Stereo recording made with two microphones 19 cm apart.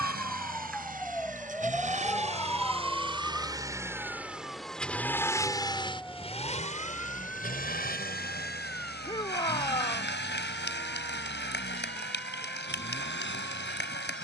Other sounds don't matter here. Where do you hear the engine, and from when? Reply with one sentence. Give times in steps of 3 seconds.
You can hear the engine on the right from 0 s, in the centre from 3 s and on the left from 6 s.